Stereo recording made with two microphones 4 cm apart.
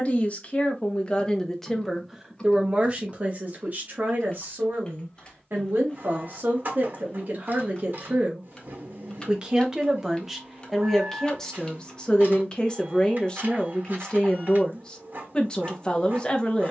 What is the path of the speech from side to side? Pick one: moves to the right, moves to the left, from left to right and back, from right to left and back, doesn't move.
from left to right and back.